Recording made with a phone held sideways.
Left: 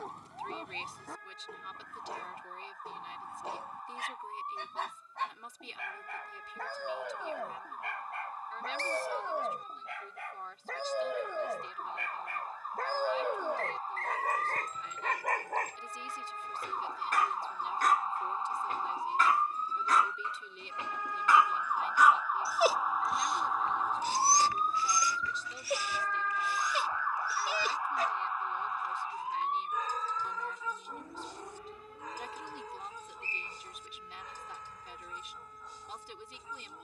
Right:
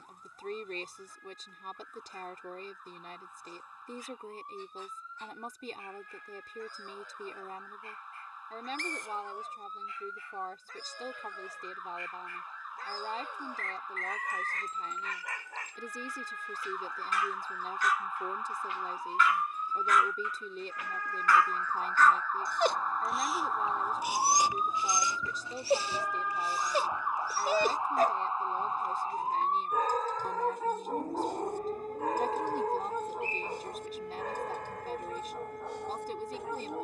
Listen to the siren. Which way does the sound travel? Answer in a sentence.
You can hear the siren move to the right.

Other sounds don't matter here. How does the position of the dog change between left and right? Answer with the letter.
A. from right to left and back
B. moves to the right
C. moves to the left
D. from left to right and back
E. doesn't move
B.